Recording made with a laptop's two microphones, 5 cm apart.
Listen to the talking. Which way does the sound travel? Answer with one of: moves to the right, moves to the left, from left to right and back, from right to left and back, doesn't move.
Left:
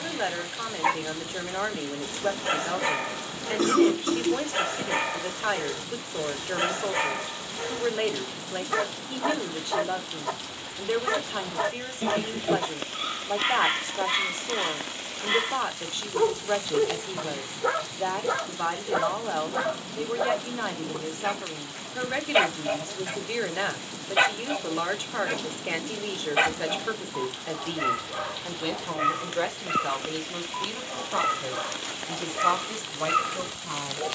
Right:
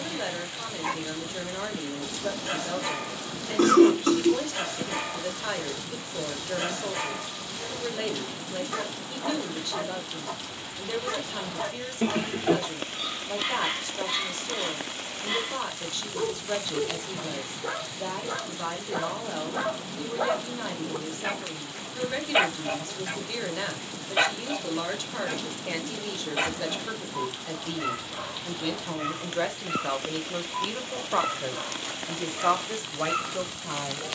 moves to the right.